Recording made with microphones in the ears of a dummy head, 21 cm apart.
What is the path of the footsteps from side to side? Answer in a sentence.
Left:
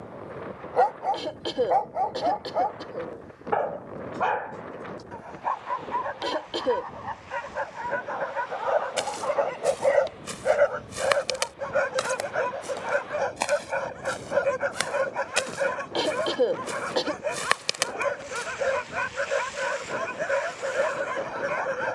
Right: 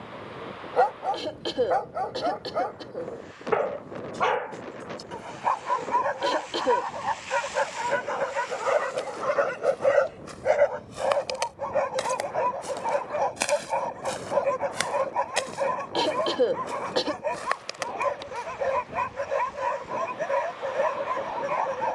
You can hear the footsteps move from left to right and back again.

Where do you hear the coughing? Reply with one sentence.
In this clip you hear the coughing in the centre.